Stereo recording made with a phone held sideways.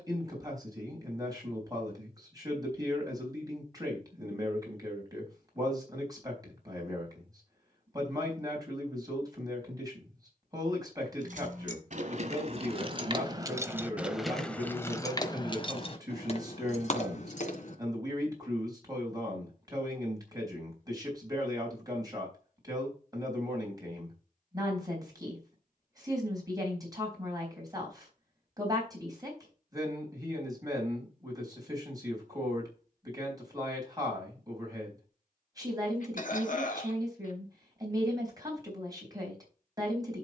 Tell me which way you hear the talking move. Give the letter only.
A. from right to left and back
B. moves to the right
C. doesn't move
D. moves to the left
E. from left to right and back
C.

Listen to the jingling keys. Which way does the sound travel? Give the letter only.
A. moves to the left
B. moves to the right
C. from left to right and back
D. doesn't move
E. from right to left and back
A.